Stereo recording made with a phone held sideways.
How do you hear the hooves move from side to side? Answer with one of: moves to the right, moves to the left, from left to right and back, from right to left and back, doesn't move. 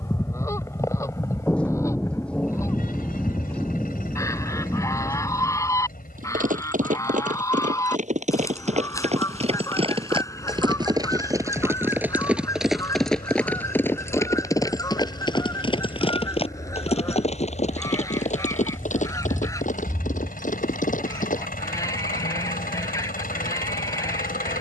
moves to the left.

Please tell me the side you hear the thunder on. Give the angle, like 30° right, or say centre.
10° left.